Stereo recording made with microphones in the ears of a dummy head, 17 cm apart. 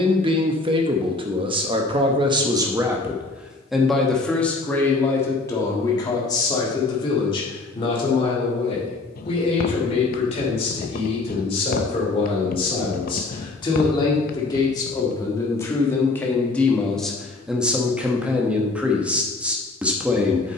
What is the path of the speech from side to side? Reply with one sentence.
In this clip you hear the speech move from right to left and back again.